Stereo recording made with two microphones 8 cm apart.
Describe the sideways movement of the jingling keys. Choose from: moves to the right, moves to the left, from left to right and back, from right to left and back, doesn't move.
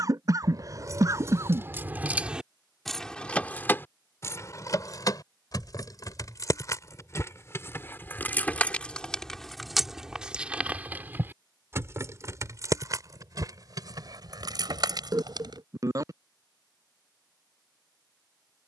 from right to left and back.